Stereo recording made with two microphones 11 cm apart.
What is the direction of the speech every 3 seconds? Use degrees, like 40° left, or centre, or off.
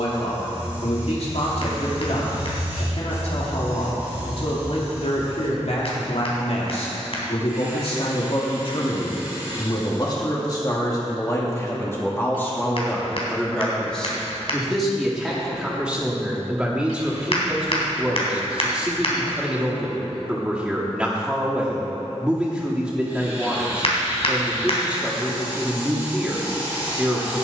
70° left, 70° left, 60° left, 30° left, 10° left, centre, 10° right, 10° right, 10° right.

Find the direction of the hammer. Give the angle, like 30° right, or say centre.
60° left.